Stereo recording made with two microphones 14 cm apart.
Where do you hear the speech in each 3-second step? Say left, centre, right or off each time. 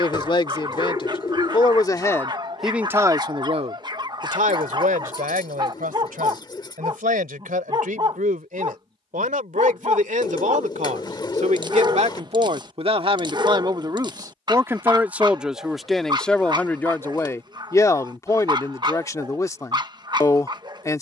left, right, right, right, right, centre, left.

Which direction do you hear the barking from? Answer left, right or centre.
right.